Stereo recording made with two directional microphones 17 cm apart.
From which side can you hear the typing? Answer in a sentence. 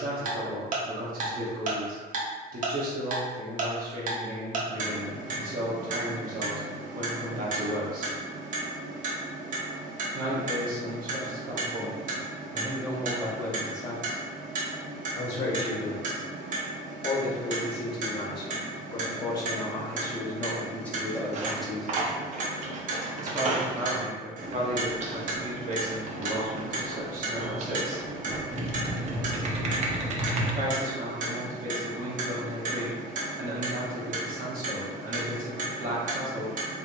You can hear the typing on the right.